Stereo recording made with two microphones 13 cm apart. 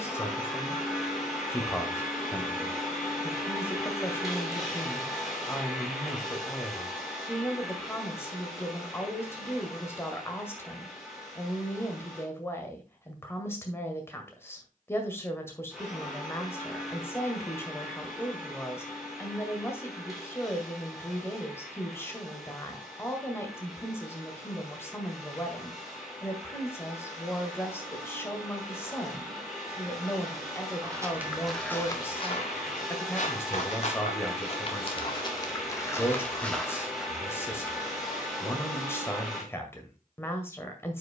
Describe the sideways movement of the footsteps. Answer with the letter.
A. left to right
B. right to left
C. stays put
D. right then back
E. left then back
E.